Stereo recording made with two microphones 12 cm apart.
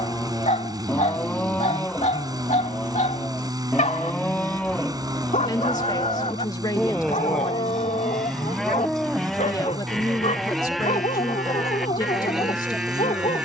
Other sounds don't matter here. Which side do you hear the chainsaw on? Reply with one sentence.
You can hear the chainsaw on the right.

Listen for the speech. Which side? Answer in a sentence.
You can hear the speech on the left.